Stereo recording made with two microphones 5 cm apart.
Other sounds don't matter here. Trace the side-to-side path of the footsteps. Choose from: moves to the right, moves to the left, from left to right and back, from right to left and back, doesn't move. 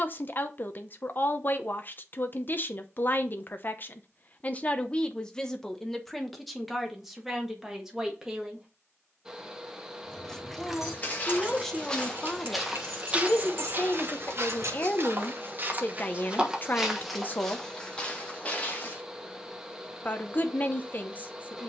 from left to right and back.